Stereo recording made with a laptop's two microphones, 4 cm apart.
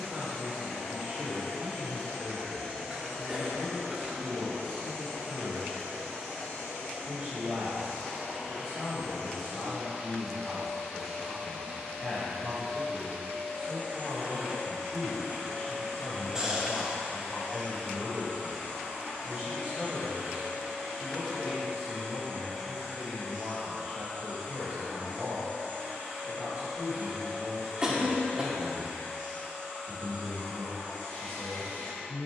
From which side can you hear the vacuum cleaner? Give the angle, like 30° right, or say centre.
10° left.